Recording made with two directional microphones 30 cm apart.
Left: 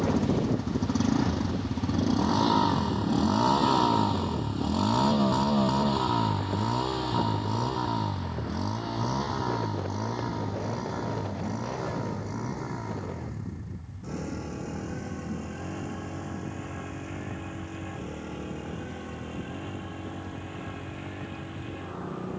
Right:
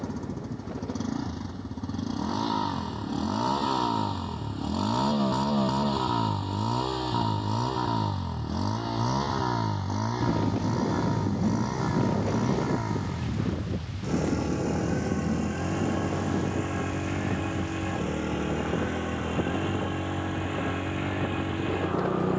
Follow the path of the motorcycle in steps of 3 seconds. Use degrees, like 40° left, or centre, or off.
30° left, 10° left, 10° right, 30° right, 40° right, 50° right, 60° right, 60° right.